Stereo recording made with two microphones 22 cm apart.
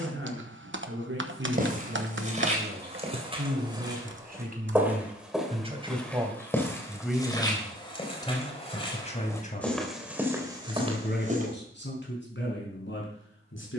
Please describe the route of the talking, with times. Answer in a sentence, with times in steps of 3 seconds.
You can hear the talking on the right from 0 s, in the centre from 6 s and on the left from 9 s.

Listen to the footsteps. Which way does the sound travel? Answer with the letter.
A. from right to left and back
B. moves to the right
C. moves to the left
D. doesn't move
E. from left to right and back
A.